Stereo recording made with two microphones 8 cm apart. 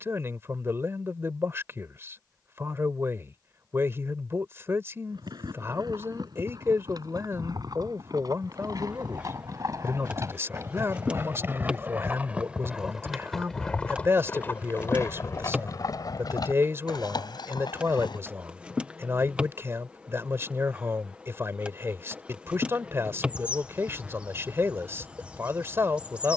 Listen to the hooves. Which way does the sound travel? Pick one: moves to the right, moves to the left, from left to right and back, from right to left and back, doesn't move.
moves to the left.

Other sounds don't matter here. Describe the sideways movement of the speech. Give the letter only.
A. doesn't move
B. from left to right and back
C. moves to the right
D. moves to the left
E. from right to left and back
A.